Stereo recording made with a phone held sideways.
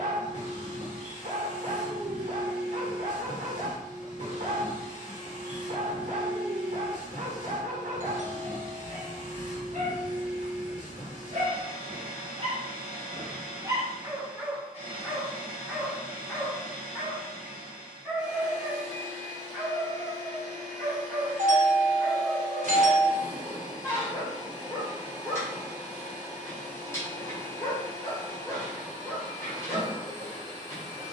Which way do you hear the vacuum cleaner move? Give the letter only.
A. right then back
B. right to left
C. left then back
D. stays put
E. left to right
D.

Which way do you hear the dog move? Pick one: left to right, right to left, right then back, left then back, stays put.
right to left.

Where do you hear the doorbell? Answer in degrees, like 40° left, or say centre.
60° right.